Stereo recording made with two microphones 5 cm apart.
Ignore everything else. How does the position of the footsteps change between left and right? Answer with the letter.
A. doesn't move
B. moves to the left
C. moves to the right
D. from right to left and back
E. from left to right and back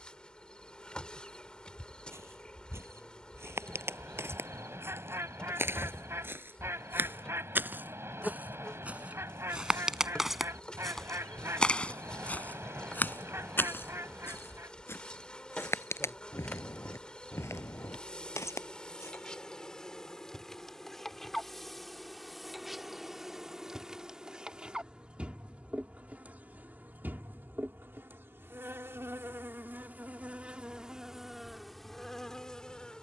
B.